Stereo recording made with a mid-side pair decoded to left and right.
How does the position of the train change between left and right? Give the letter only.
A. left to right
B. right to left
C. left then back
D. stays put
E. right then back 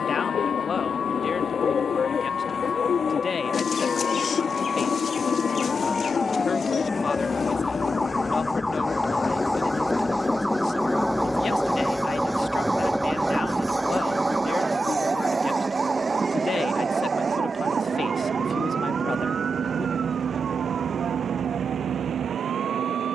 A.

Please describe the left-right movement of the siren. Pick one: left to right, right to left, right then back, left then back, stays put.
left to right.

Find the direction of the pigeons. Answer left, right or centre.
left.